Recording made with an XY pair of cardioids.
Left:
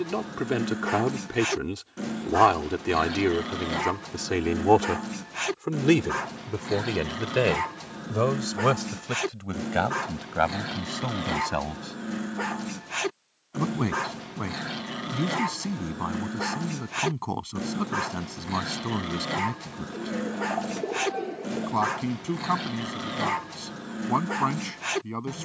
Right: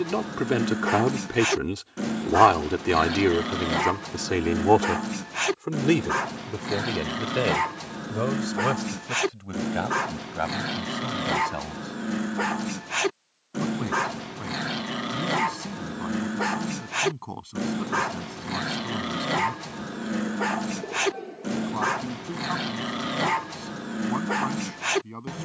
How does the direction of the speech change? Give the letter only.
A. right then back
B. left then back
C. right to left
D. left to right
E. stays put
C.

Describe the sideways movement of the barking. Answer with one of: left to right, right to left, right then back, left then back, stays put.
stays put.